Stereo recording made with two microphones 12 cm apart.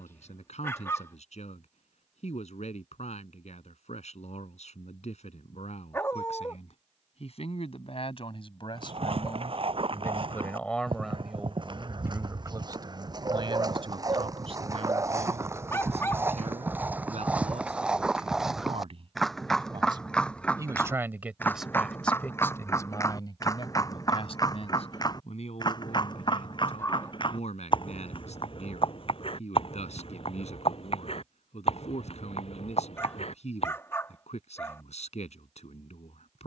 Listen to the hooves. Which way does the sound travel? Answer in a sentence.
You can hear the hooves travel towards the left.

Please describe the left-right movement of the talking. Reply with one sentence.
You can hear the talking move from left to right and back again.